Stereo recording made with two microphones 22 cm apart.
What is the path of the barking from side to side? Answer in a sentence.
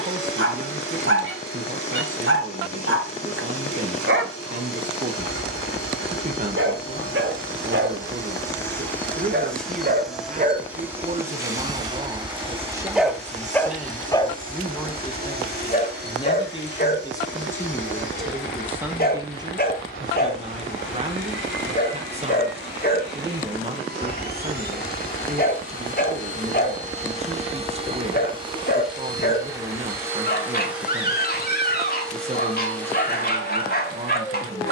You can hear the barking move to the left.